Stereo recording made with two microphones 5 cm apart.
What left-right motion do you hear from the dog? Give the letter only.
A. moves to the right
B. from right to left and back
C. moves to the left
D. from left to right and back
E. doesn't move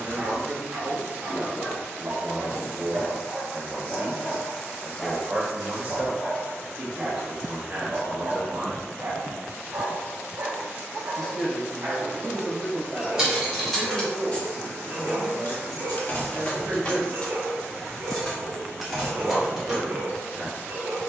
B.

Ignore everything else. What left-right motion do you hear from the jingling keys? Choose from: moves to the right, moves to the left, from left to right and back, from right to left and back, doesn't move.
from right to left and back.